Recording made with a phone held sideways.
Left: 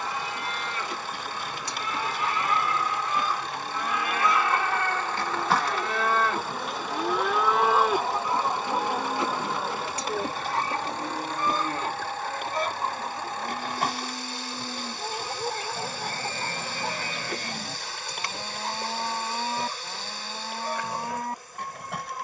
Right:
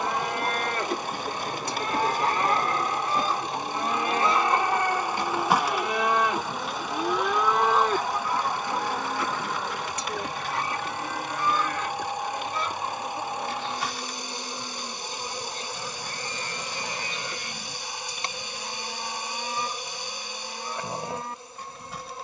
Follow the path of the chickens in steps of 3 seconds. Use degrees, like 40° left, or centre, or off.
50° right, 20° right, 10° left, 40° left, 50° left, 60° left, 70° left, 70° left.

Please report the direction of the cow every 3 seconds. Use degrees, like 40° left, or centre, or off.
50° right, 30° right, centre, 20° left, 40° left, 50° left, 50° left, 50° left.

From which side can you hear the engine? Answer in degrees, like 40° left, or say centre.
20° right.